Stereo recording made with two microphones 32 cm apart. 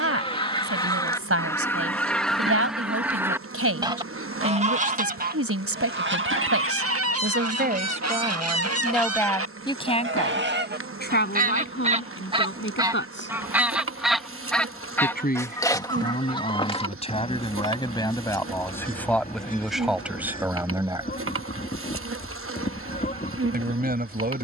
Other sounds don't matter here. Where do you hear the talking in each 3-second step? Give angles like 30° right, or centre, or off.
40° right, 40° right, 30° right, 20° left, 40° left, 20° left, centre, 30° right.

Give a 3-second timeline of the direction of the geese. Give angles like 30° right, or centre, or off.
10° left, 20° right, 50° right, 30° right, 10° right, 20° left, 30° left, 30° left.